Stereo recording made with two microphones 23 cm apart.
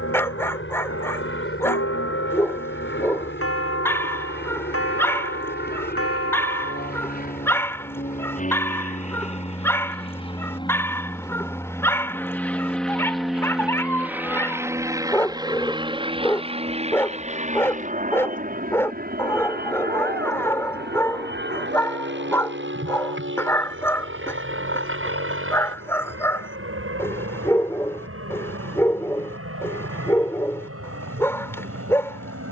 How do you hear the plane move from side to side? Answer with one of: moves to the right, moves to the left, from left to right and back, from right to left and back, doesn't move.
moves to the right.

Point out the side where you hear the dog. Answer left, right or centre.
centre.